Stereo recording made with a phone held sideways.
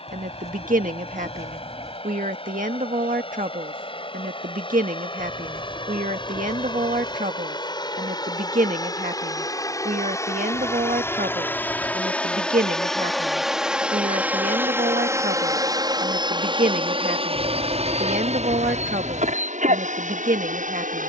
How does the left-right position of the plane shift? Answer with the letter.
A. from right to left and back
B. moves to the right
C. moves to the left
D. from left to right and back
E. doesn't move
B.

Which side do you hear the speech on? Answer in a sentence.
You can hear the speech on the right.